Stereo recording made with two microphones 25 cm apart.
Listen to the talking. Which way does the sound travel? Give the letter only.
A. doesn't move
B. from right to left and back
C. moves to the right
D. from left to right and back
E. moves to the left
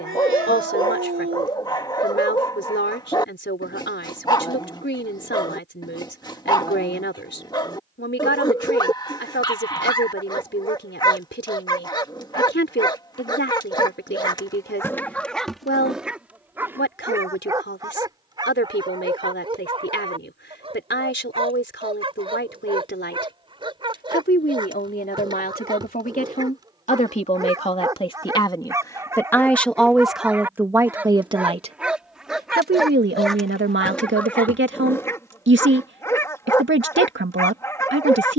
C.